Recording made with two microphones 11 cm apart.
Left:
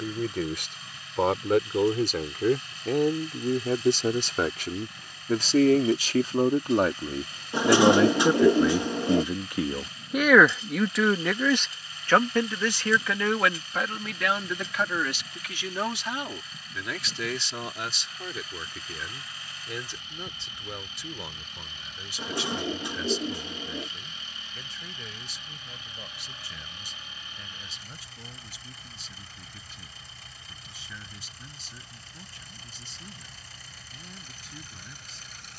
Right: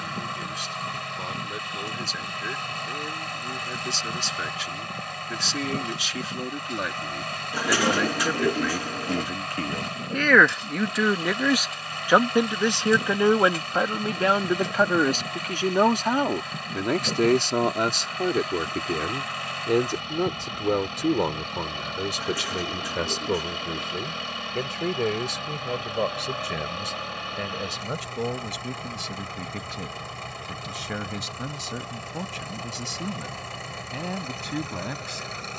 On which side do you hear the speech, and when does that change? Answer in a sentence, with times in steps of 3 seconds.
In this clip you hear the speech on the left from 0 s, in the centre from 9 s and on the right from 12 s.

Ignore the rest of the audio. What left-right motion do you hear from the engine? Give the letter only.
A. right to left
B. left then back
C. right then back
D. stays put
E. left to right
D.